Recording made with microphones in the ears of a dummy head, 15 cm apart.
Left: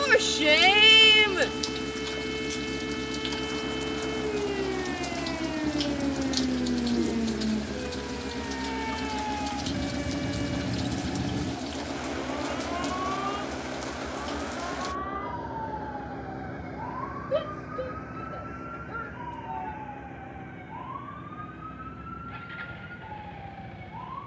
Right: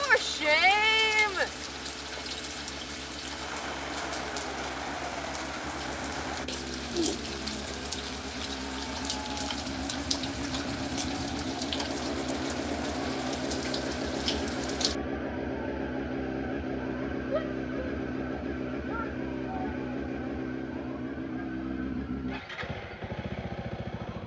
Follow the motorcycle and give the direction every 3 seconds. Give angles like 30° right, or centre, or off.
50° left, 40° left, 20° left, 10° left, 10° right, 30° right, 50° right, 50° right.